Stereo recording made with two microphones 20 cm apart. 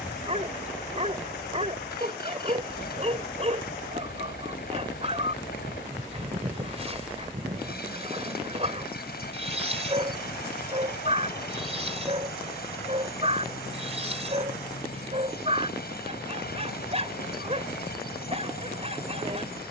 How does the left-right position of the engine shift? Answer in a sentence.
You can hear the engine stay put.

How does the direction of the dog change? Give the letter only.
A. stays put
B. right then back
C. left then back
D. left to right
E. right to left
A.